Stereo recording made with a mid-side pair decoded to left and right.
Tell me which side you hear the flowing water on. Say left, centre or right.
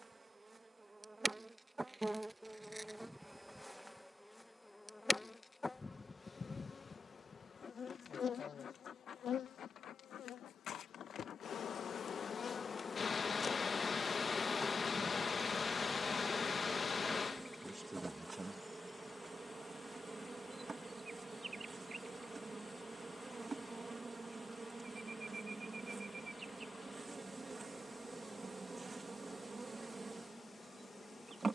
left.